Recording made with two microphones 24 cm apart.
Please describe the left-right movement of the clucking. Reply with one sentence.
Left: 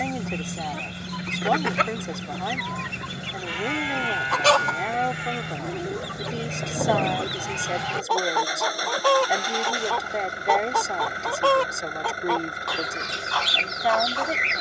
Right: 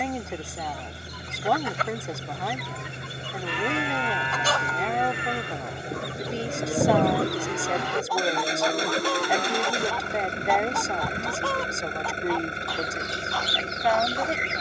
You can hear the clucking stay in one place.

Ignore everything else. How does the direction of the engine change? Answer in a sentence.
You can hear the engine stay in one place.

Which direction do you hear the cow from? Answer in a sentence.
In this clip you hear the cow on the right.